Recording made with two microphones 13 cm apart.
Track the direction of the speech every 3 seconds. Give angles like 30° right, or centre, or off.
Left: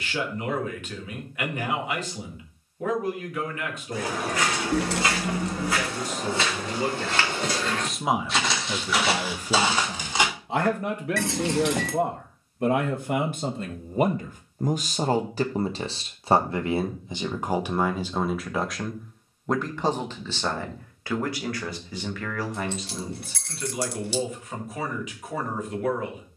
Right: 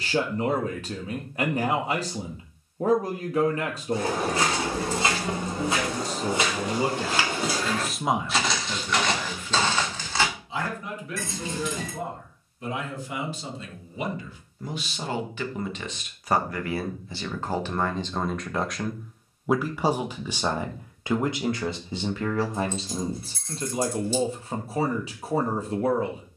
40° right, 40° right, 10° right, 60° left, 50° left, 30° left, 10° right, 30° right, 30° right.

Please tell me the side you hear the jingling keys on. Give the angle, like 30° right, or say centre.
80° left.